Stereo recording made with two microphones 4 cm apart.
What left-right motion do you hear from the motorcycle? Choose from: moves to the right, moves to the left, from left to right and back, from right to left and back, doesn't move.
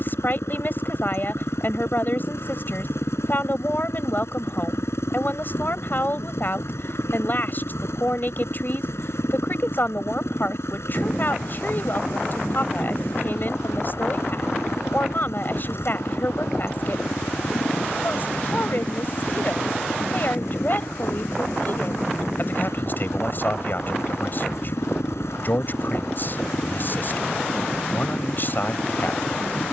doesn't move.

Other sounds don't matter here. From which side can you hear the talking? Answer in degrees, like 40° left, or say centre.
50° left.